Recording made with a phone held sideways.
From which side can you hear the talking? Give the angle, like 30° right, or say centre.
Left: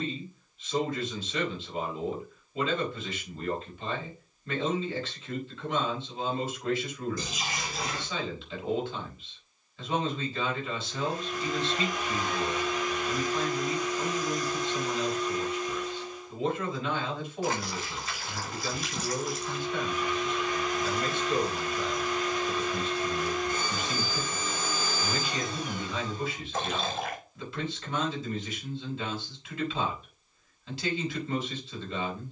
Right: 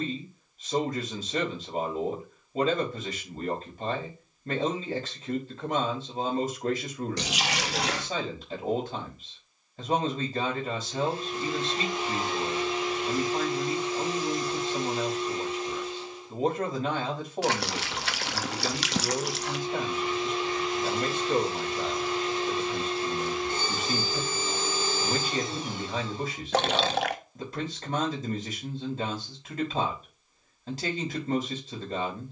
40° right.